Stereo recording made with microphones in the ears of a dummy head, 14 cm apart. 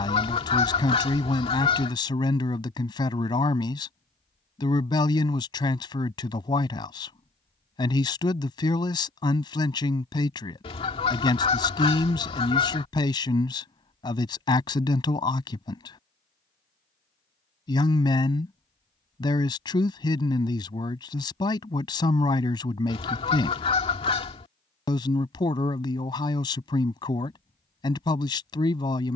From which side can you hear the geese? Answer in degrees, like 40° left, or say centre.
40° left.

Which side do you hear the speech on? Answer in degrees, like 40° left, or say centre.
30° left.